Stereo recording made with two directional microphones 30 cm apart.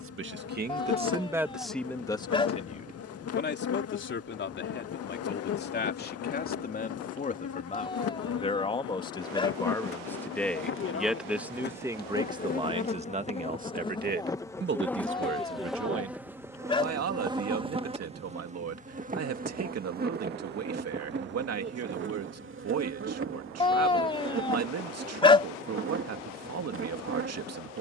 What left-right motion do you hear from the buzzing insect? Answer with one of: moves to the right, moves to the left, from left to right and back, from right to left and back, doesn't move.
moves to the right.